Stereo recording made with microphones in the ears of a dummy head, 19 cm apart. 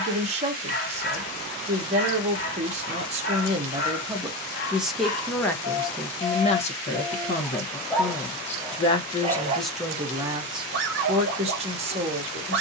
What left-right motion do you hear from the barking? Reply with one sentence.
In this clip you hear the barking travel towards the right.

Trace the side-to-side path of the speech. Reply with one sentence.
You can hear the speech move from right to left and back again.